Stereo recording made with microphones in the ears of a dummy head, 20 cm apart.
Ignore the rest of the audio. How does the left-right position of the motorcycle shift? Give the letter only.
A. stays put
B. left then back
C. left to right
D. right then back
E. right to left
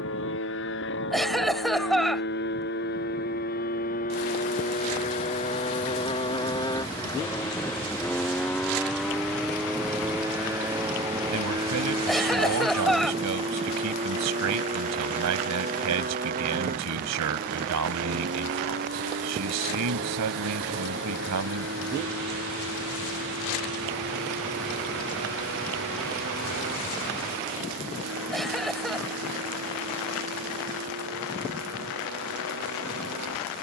C.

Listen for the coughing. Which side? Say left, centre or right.
centre.